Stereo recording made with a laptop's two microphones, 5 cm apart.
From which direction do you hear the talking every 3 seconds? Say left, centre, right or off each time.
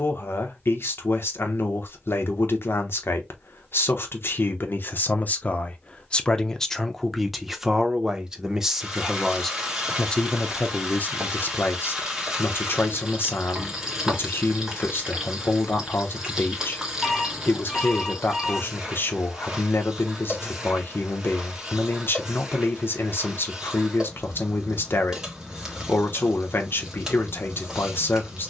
left, left, centre, left, left, left, left, left, left, left.